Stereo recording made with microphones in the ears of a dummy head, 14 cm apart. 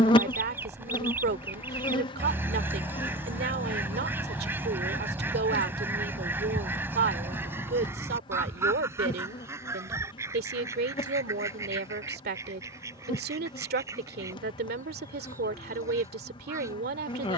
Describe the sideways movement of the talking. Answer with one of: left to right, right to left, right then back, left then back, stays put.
stays put.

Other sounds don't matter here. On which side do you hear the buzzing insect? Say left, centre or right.
left.